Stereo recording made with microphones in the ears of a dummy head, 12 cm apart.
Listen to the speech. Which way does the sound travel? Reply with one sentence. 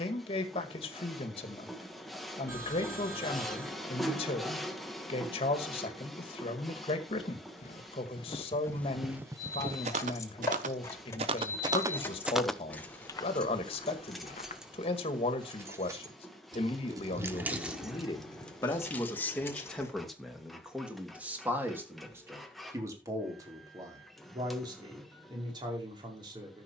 In this clip you hear the speech go from the left side to the right.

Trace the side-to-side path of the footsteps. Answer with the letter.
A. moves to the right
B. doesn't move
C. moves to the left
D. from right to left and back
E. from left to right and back
E.